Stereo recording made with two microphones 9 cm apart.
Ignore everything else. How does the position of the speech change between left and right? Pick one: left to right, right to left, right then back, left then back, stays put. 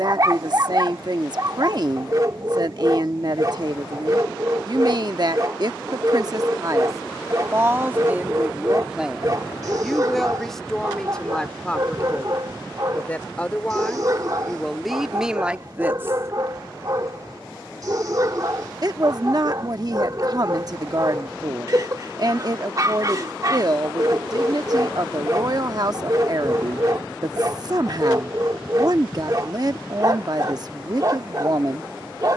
left then back.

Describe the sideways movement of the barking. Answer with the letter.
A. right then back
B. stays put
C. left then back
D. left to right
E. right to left
B.